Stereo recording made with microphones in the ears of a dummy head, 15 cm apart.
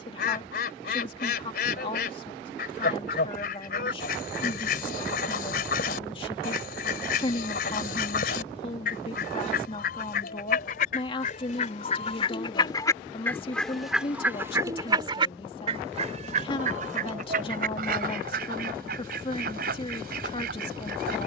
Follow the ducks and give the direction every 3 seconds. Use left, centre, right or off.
left, left, left, left, centre, right, right.